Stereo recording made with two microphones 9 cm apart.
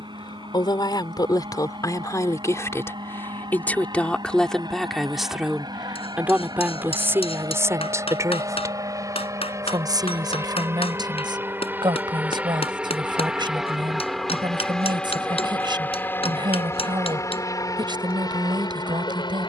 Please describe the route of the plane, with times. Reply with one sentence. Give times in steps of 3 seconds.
In this clip you hear the plane on the right from 0 s, in the centre from 12 s and on the left from 15 s.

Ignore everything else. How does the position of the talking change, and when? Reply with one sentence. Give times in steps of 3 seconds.
In this clip you hear the talking on the left from 0 s, in the centre from 3 s and on the right from 6 s.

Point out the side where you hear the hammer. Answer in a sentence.
You can hear the hammer on the left.